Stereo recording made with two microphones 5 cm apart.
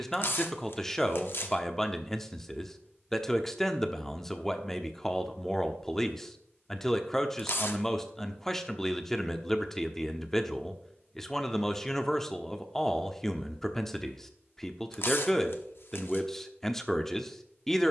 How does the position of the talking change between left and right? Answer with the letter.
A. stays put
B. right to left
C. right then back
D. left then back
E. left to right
A.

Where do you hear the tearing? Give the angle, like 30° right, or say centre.
60° left.